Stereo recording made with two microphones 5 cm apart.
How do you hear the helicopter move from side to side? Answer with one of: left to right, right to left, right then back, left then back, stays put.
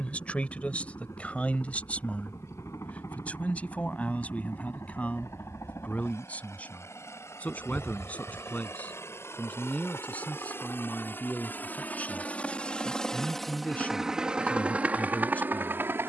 left to right.